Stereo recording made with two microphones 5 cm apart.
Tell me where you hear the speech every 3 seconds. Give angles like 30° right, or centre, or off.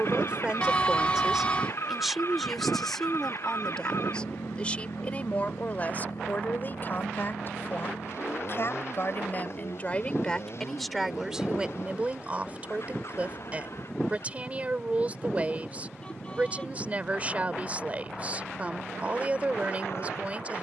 10° right, 20° left, 40° left, 10° left, 30° right, 30° right, 30° right.